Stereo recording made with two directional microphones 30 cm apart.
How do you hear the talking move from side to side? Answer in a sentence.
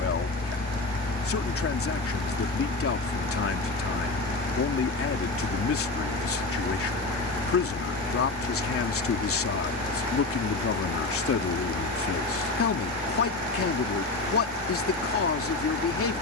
In this clip you hear the talking stay in one place.